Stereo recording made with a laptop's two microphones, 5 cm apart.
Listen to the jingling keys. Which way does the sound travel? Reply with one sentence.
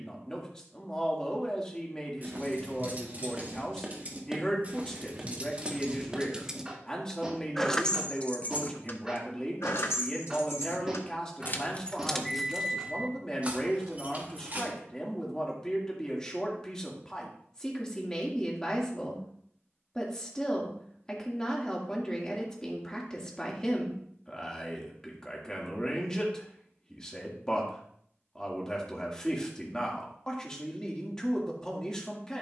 In this clip you hear the jingling keys move from right to left and back again.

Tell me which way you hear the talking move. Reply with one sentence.
In this clip you hear the talking stay put.